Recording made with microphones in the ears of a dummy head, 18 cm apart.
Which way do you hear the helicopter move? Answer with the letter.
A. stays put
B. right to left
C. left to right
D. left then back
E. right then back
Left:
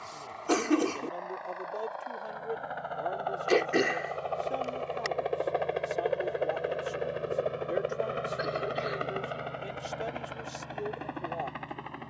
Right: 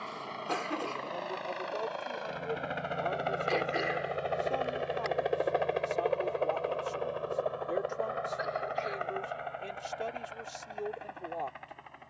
B.